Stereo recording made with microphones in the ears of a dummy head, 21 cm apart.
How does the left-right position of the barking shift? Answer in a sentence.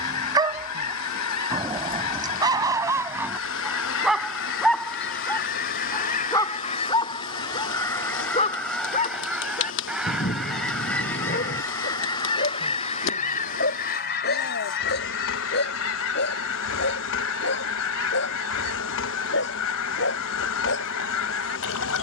In this clip you hear the barking move from right to left.